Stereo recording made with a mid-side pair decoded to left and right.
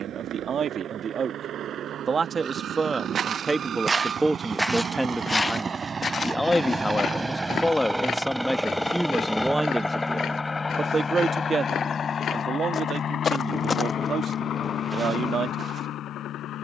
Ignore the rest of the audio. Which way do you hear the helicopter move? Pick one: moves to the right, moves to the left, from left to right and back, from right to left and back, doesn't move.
moves to the left.